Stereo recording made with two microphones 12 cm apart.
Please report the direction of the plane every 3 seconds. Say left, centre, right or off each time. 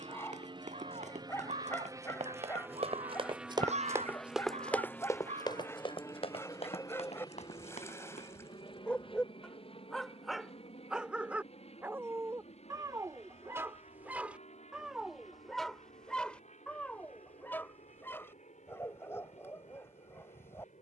right, centre, left, left, left, left, left.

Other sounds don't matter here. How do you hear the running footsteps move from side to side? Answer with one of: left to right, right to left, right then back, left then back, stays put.
right to left.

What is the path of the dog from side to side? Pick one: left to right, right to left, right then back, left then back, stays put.
right then back.